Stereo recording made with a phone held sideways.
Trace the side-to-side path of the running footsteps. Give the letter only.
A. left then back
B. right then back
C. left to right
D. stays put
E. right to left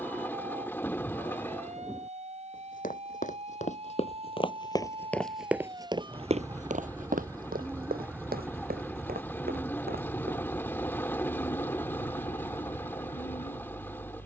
C.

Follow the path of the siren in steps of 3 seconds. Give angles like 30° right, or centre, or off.
50° right, 40° right, 20° right, 20° left, 50° left.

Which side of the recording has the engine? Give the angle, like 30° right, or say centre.
10° left.